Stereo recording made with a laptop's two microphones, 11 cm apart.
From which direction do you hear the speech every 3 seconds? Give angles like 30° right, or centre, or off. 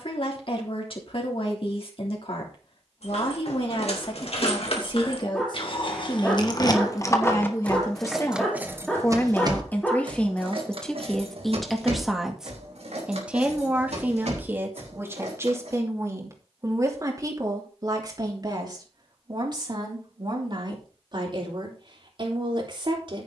60° left, 50° left, 30° left, 10° left, 10° right, 30° right, 40° right, 50° right.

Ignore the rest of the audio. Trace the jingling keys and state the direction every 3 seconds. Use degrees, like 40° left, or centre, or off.
off, 60° left, 10° left, 50° right, 70° right, 80° right, off, off.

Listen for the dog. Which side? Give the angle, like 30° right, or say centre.
10° left.